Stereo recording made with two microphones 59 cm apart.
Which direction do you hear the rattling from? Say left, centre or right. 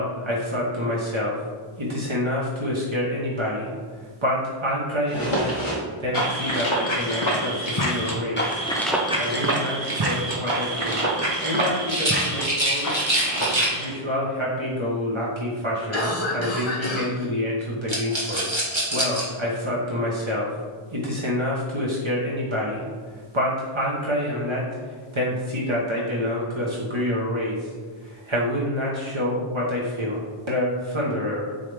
right.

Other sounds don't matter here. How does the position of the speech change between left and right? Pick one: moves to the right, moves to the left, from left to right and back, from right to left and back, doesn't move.
doesn't move.